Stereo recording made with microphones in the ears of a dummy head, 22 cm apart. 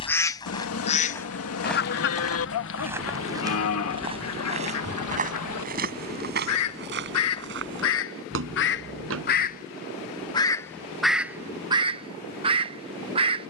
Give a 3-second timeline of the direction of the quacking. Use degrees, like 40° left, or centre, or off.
40° left, 60° left, 60° left, centre, 20° right.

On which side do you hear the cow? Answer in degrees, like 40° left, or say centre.
70° left.